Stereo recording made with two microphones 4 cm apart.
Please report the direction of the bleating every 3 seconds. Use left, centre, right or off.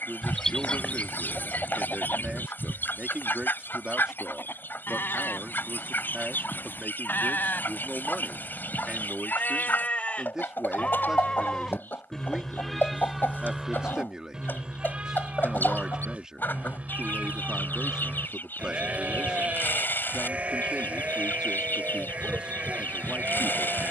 left, left, left, left, centre, right, right, right.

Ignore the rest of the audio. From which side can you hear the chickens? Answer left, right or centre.
left.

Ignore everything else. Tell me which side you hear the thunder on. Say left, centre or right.
left.